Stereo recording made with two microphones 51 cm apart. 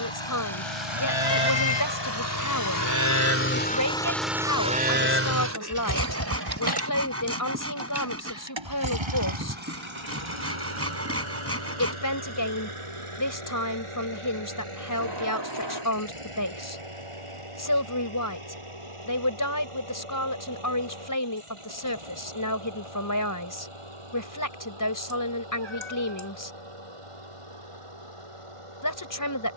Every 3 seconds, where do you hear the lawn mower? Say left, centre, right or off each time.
left, centre, right, right, right, right, right, right, right, right.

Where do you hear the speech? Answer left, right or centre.
left.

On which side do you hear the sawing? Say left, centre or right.
right.